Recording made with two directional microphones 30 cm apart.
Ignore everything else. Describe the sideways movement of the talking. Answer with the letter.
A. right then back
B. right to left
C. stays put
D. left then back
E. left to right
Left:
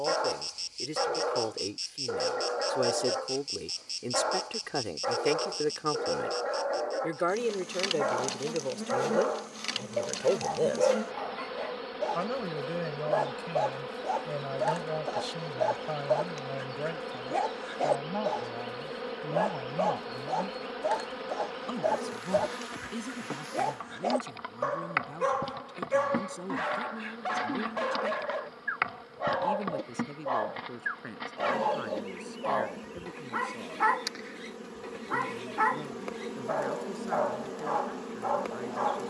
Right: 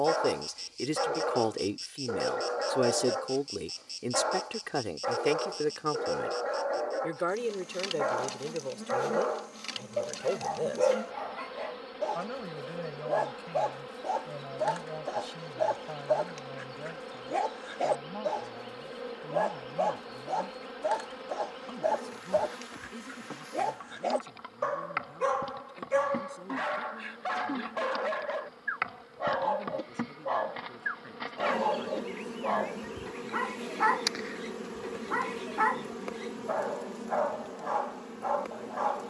B.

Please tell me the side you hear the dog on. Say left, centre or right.
centre.